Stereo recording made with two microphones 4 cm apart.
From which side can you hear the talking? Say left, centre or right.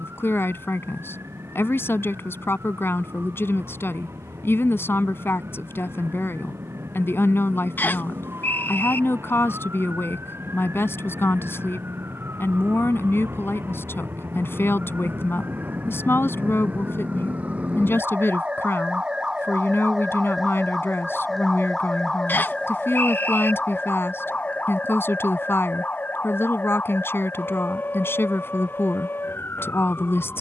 left.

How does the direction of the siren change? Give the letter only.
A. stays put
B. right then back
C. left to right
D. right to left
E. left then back
D.